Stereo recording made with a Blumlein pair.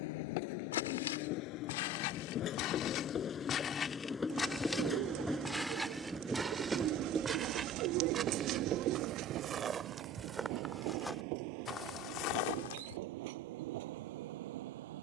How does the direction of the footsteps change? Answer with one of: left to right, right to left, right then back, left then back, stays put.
right then back.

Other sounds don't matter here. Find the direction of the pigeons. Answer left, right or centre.
right.